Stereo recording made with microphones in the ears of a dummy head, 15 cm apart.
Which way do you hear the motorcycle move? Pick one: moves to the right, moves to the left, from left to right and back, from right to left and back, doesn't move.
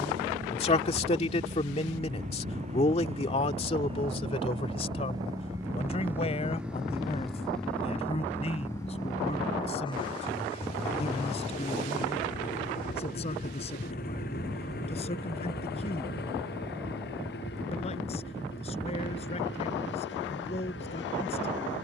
moves to the left.